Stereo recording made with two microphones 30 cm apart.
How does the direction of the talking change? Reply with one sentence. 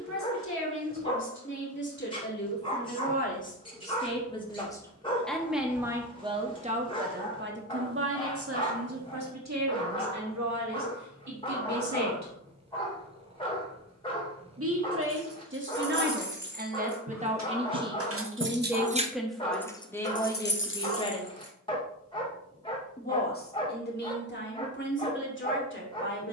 You can hear the talking move from left to right and back again.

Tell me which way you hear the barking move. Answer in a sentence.
You can hear the barking stay put.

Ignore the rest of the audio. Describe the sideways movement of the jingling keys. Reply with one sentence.
In this clip you hear the jingling keys move to the left.